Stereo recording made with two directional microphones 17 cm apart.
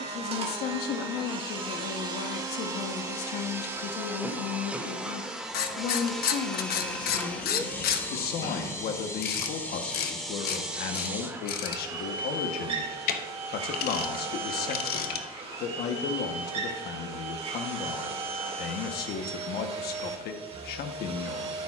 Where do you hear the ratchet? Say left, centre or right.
left.